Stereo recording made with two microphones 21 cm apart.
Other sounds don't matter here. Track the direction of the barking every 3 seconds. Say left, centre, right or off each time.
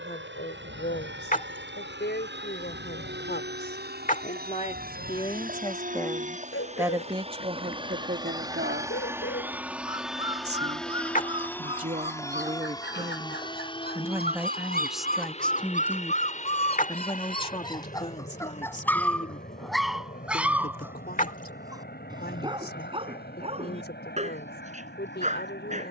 left, left, left, left, left, left, centre, right, right.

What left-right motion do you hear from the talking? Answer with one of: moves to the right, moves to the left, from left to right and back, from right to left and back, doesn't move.
from left to right and back.